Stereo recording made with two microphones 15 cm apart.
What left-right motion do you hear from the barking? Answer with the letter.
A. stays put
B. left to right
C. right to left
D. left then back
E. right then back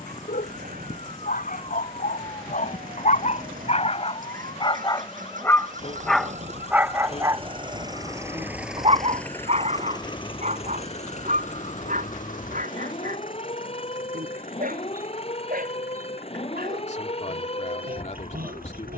B.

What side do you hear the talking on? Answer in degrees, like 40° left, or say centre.
50° left.